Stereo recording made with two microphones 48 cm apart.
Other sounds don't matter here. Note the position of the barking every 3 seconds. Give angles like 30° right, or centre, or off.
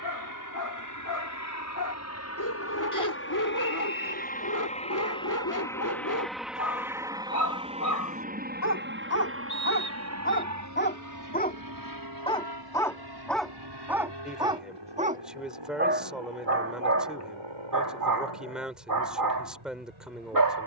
40° left, 40° left, 40° left, 20° left, centre, 30° right, 40° right.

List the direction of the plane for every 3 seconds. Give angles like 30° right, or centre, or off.
40° left, 20° left, 10° right, 30° right, 50° right, 60° right, 60° right.